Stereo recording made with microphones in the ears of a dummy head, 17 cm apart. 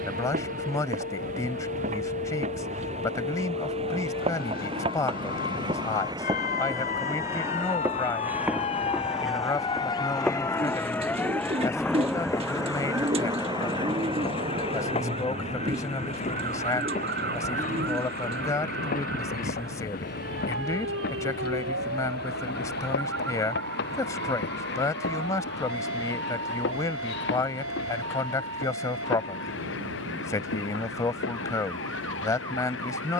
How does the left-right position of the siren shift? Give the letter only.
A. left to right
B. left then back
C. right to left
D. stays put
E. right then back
A.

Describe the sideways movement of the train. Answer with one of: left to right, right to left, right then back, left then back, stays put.
right to left.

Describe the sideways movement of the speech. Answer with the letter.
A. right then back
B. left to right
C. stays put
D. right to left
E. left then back
C.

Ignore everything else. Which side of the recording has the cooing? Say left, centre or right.
right.